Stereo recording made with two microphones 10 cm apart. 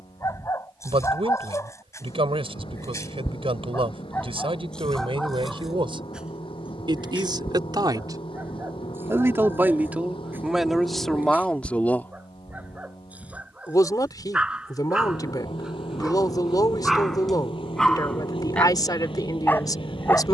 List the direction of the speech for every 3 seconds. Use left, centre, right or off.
right, right, right, centre, left, left, left.